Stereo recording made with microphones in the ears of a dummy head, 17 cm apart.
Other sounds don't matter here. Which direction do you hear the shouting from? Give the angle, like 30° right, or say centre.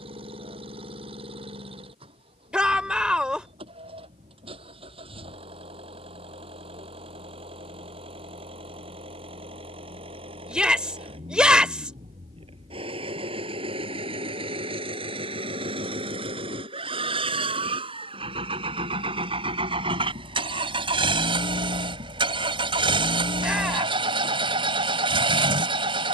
10° right.